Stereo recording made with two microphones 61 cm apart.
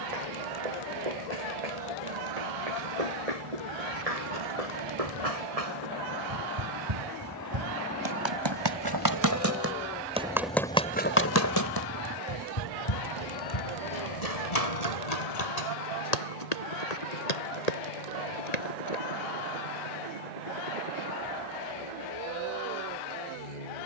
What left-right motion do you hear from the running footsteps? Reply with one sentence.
You can hear the running footsteps go from the right side to the left.